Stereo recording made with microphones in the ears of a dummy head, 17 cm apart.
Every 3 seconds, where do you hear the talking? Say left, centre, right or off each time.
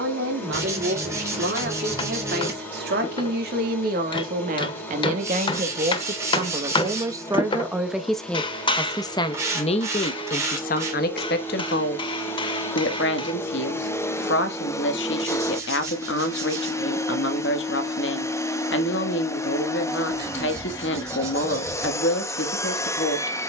right, right, centre, left, left, left, left, left.